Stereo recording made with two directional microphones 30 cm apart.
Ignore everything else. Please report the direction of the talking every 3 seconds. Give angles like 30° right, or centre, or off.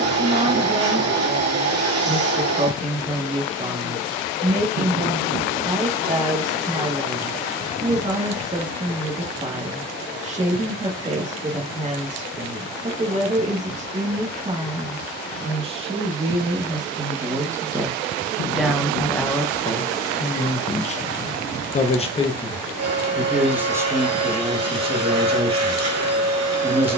20° right, 20° right, 20° right, 20° right, 20° right, 10° right, 10° left, 10° left, 20° right.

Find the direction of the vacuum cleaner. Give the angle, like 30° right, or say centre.
60° right.